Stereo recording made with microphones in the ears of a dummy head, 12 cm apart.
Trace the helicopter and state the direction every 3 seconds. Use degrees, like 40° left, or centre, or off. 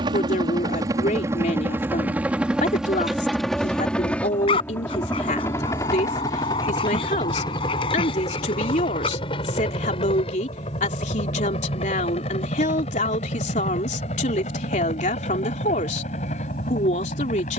20° right, 10° left, 30° left, 40° left, 50° left, 50° left.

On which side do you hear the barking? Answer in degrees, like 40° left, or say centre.
40° left.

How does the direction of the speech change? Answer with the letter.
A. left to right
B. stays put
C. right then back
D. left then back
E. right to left
B.